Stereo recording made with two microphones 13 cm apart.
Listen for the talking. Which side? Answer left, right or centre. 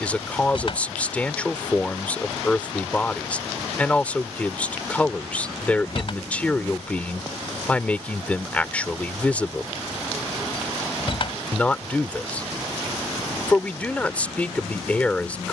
centre.